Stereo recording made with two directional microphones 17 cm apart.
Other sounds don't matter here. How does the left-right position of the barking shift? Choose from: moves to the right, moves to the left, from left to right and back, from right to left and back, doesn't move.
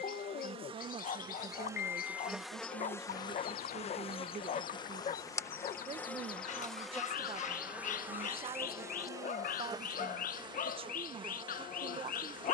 doesn't move.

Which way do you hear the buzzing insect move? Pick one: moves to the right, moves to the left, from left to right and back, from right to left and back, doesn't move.
from right to left and back.